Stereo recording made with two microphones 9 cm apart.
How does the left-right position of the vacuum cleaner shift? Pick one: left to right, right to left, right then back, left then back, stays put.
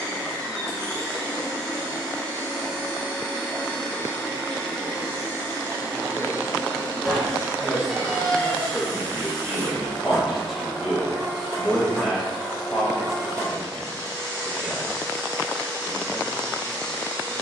stays put.